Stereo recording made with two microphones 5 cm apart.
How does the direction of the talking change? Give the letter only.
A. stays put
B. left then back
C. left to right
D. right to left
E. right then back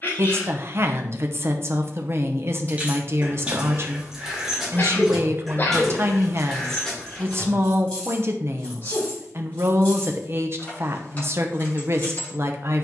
A.